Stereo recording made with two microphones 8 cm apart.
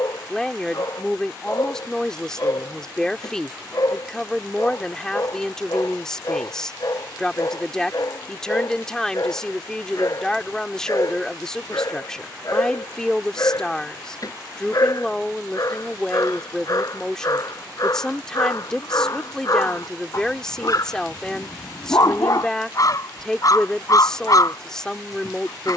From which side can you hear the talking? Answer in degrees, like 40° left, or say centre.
10° left.